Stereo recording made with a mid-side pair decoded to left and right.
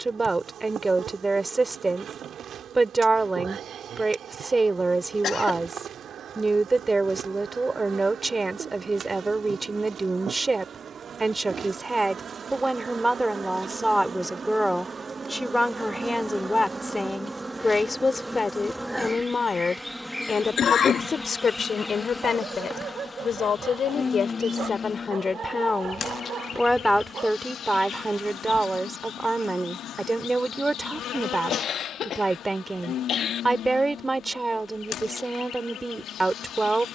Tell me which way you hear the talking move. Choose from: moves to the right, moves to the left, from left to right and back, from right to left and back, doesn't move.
from right to left and back.